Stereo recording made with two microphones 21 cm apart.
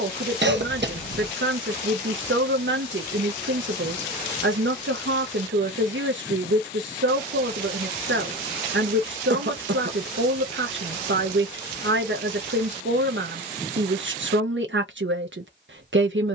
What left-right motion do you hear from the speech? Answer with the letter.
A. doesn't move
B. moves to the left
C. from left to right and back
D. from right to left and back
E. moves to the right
A.